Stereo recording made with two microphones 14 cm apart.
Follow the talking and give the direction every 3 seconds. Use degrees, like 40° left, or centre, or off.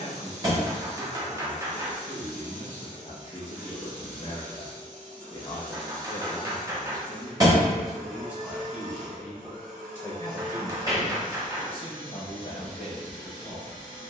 60° left, 50° left, 10° left, 20° left, 50° left.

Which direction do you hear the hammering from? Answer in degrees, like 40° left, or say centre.
20° right.